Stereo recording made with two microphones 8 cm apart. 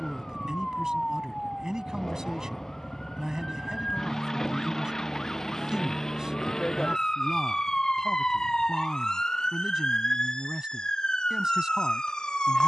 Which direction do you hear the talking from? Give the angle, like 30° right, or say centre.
10° right.